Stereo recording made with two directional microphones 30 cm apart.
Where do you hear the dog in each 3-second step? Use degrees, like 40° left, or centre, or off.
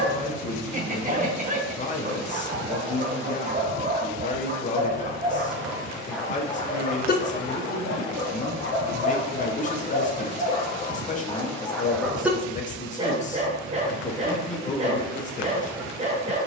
30° right, 20° right, 30° left, 20° left, 20° right, 20° right.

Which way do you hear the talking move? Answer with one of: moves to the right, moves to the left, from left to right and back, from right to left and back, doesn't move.
doesn't move.